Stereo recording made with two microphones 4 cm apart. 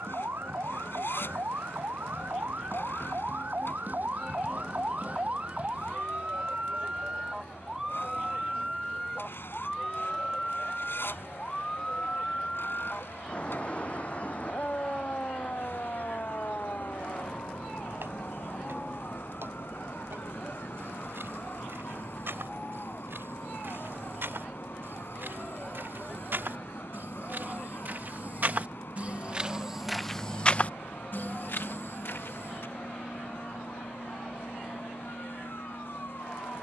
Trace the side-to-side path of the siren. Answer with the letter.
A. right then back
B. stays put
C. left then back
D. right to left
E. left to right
D.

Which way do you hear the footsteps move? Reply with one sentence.
In this clip you hear the footsteps travel towards the left.